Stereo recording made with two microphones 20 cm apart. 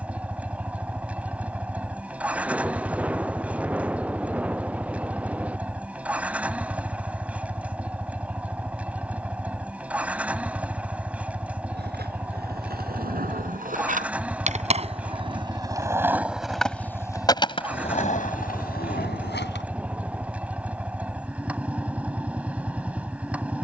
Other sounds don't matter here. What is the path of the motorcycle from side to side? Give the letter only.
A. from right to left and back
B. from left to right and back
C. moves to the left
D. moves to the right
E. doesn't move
E.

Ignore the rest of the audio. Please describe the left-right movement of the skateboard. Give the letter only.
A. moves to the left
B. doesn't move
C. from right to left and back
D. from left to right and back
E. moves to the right
A.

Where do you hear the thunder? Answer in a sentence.
In this clip you hear the thunder in the centre.